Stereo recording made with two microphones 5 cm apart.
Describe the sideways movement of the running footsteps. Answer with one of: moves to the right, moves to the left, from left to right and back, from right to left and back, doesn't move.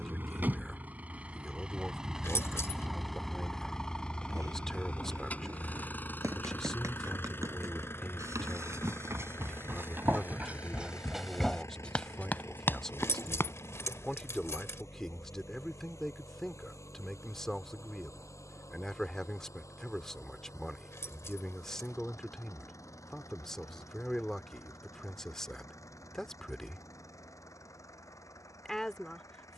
moves to the left.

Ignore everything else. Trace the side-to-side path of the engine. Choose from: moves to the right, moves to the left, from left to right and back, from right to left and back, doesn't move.
moves to the left.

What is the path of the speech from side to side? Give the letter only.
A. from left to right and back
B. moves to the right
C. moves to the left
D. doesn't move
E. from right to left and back
D.